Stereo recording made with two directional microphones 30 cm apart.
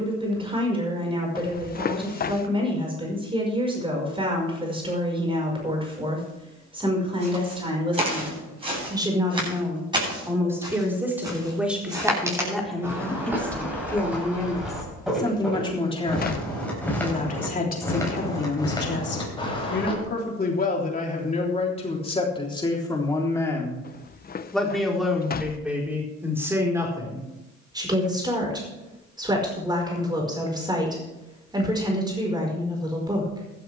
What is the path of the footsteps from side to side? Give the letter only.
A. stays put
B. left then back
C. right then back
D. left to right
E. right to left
E.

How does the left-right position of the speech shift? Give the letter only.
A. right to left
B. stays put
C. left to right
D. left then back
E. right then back
D.